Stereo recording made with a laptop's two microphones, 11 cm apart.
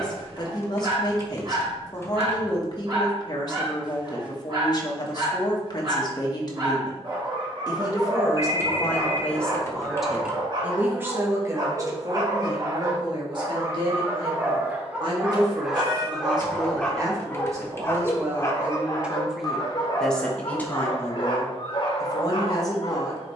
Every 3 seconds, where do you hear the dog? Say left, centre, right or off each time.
right, right, right, right, right, centre, left, left.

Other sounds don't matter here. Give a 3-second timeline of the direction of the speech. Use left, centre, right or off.
left, left, left, centre, right, right, centre, left.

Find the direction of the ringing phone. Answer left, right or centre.
right.